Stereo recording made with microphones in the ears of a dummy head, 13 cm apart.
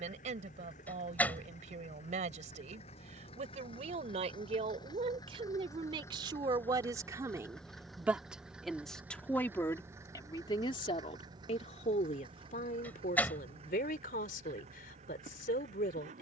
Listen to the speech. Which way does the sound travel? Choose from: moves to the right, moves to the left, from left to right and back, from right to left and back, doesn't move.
moves to the left.